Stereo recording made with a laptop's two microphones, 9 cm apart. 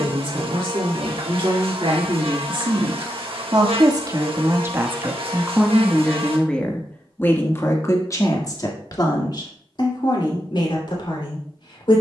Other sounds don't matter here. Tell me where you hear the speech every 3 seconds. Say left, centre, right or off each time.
right, right, left, left.